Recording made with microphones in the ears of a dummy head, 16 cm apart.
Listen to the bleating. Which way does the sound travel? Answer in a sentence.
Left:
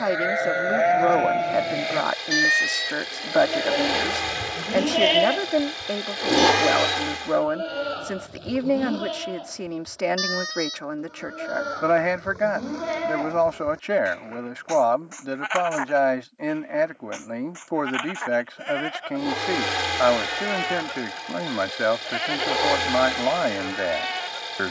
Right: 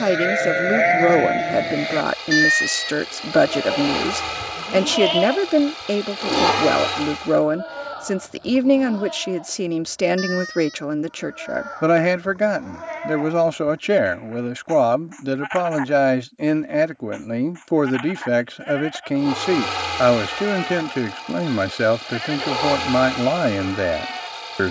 You can hear the bleating move to the left.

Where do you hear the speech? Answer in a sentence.
You can hear the speech on the right.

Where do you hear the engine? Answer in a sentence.
You can hear the engine in the centre.